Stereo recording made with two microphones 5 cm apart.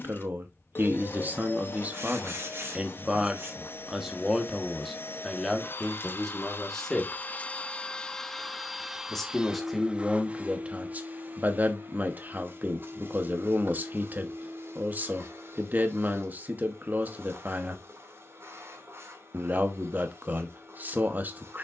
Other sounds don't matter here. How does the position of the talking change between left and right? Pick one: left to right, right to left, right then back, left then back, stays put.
left then back.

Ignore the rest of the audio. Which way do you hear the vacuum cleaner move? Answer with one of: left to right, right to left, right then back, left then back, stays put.
left to right.